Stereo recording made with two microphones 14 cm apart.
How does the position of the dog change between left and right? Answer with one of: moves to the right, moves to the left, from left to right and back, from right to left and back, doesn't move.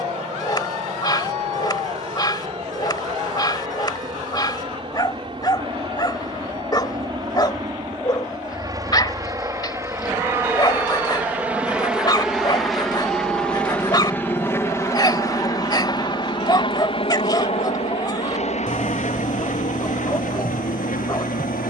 doesn't move.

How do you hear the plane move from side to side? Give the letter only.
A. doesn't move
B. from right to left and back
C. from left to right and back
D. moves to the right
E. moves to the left
E.